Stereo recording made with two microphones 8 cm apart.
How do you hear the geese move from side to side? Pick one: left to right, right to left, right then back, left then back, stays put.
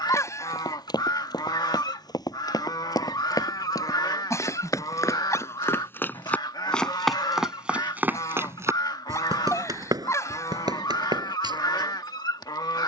stays put.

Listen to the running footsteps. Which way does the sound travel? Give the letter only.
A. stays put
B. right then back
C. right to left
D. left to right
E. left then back
D.